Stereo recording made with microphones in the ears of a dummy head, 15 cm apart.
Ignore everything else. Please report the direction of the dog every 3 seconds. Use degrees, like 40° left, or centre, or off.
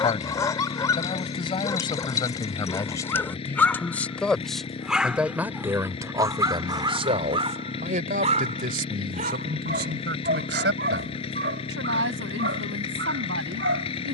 20° left, centre, 30° right, 60° right, 70° right.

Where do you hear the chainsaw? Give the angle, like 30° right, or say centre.
30° left.